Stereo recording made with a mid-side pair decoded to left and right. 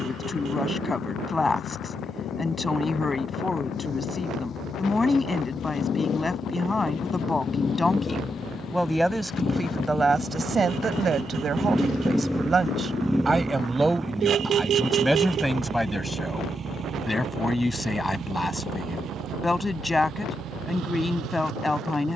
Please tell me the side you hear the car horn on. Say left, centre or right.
right.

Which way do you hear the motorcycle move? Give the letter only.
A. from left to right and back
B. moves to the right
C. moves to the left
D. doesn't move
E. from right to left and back
B.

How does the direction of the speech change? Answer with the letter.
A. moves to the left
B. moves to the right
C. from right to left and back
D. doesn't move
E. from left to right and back
E.